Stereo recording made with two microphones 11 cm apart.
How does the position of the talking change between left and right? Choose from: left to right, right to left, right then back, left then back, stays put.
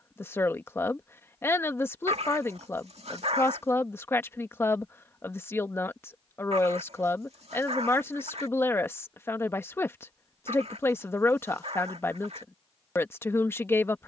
stays put.